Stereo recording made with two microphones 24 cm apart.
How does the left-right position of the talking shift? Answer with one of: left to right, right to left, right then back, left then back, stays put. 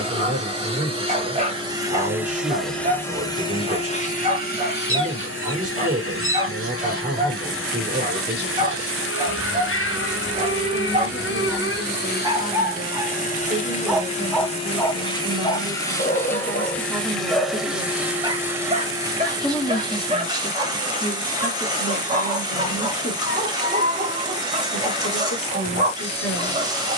right to left.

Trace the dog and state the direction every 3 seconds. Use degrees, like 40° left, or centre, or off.
30° right, 30° right, 30° right, 30° right, centre, 20° left, 20° right, 30° right, 30° right.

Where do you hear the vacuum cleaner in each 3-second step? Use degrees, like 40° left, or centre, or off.
10° right, 40° left, 60° left, 50° left, 30° left, 10° left, 10° right, 20° right, 20° right.